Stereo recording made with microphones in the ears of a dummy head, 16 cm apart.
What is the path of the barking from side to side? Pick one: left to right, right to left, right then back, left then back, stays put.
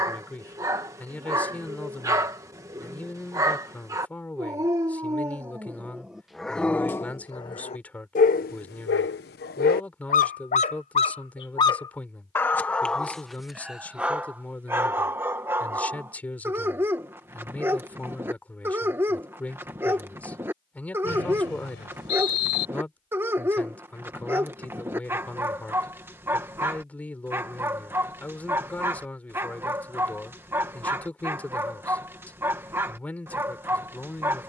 left then back.